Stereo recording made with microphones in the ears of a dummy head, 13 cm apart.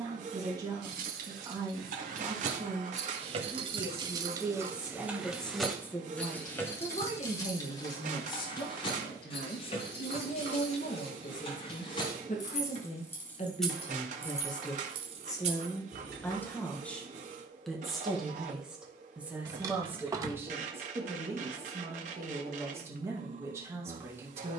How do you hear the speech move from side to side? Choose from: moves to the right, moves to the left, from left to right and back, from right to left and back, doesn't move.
from right to left and back.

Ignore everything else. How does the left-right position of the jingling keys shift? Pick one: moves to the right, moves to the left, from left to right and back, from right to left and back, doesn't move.
from right to left and back.